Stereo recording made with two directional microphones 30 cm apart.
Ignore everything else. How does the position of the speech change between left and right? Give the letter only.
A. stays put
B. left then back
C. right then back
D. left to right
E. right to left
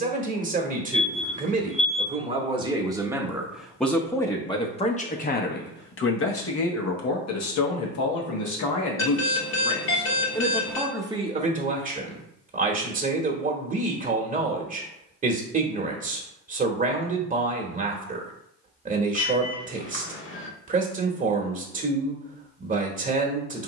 B.